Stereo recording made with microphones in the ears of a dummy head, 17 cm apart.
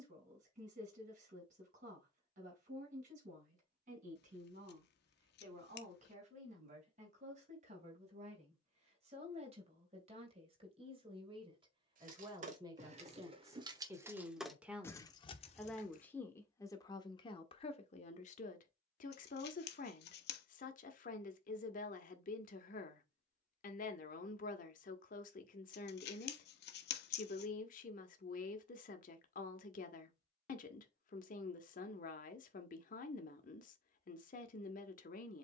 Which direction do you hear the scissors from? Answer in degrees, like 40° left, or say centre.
60° left.